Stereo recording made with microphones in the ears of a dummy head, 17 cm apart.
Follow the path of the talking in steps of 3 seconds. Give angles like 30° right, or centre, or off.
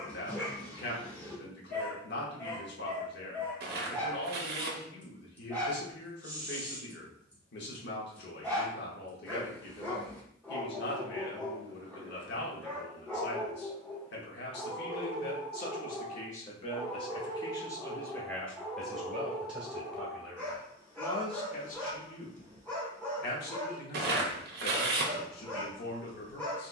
60° left, 60° left, 60° left, 60° left, 60° left, 30° left, centre, 50° left, 50° left.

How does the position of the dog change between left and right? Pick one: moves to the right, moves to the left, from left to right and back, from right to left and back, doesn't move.
doesn't move.